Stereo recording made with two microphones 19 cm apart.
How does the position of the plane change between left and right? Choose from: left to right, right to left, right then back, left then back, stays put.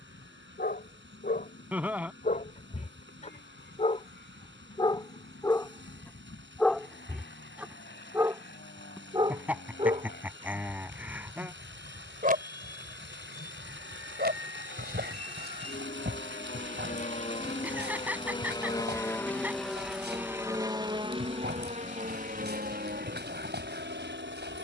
left to right.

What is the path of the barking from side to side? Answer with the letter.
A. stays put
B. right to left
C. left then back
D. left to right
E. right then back
D.